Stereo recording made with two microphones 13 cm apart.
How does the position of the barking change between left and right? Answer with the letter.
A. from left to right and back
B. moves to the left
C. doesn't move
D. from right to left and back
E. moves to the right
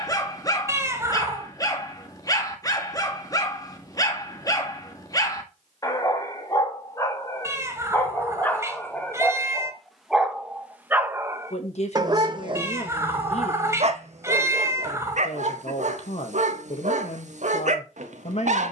E.